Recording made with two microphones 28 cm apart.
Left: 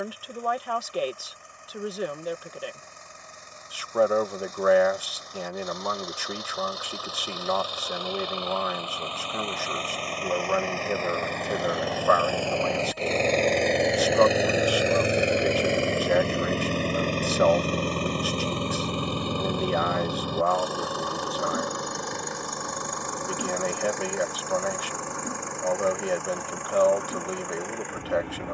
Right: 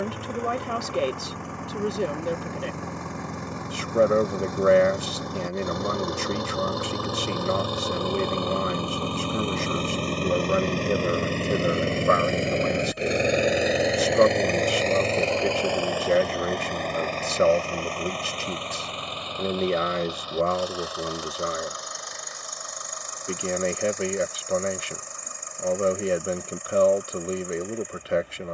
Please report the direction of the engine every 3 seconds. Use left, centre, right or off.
right, right, right, right, centre, left, left, left, left, left.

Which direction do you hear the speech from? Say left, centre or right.
right.